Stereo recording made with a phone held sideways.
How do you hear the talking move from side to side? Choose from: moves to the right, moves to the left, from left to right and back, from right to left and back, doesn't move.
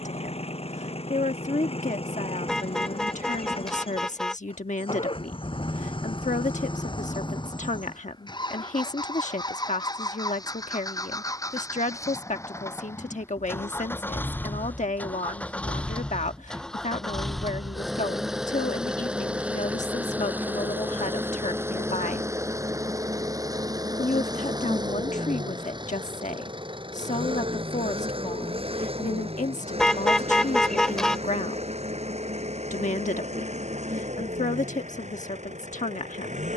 doesn't move.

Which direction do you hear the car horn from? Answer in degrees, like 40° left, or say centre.
centre.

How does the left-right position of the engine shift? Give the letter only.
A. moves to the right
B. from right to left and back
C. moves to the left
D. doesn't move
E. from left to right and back
A.